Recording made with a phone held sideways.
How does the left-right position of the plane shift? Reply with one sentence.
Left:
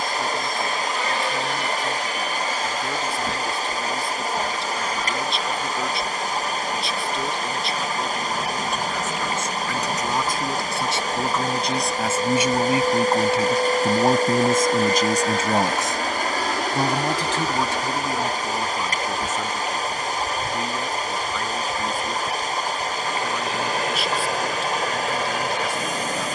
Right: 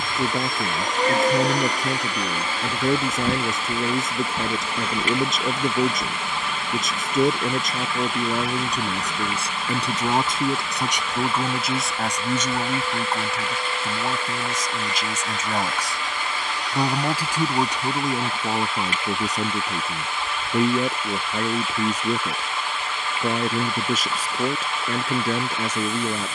You can hear the plane move to the left.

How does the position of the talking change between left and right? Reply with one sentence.
In this clip you hear the talking go left and come back.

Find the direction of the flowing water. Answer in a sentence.
You can hear the flowing water on the left.